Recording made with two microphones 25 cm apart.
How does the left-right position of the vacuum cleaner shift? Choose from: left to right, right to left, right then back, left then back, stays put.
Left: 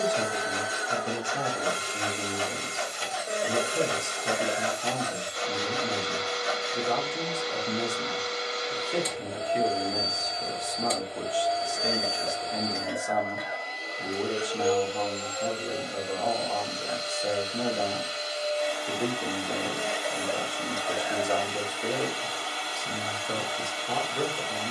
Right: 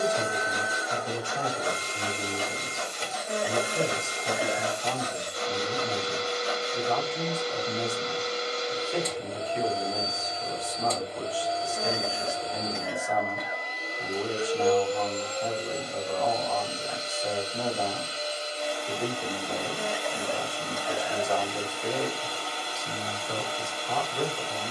stays put.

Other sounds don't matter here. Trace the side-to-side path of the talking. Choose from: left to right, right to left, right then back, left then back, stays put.
stays put.